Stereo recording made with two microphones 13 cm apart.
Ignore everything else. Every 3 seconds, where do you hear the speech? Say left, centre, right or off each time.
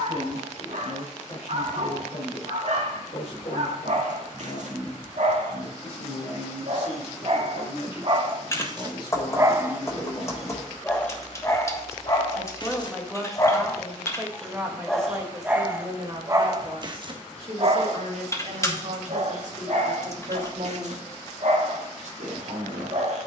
left, left, left, left, centre, right, right, right.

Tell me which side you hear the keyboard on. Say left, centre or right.
left.